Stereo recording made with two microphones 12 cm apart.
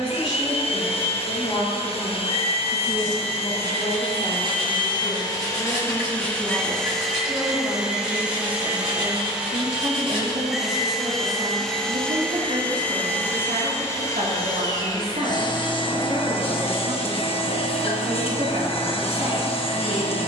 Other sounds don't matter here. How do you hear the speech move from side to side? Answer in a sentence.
In this clip you hear the speech move from left to right.